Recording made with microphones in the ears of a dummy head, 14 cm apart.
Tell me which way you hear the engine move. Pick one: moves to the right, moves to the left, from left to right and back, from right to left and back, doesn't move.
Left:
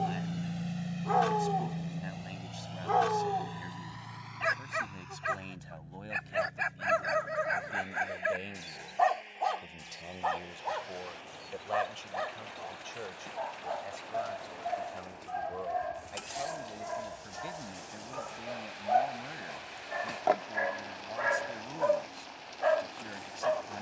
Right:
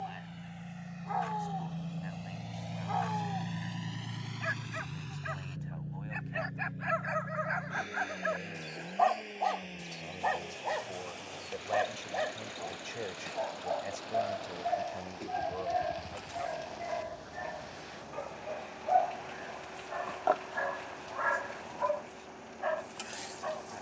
moves to the right.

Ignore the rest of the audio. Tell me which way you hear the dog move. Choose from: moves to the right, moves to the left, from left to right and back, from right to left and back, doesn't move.
from left to right and back.